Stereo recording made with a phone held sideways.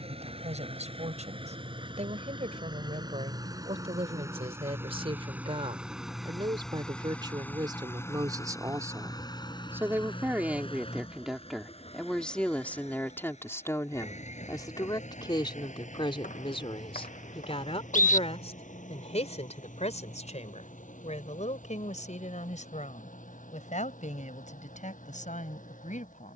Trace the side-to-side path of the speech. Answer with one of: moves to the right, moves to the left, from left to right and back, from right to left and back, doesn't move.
moves to the left.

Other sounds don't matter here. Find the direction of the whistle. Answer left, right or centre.
left.